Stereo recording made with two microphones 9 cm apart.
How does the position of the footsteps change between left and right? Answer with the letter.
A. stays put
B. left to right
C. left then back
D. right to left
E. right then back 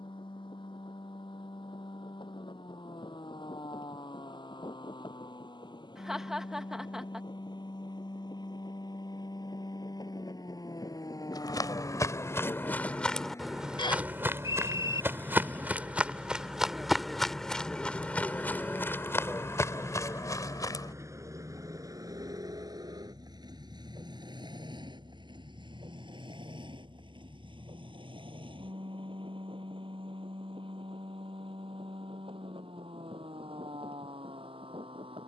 E.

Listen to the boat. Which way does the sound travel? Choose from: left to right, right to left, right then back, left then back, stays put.
left to right.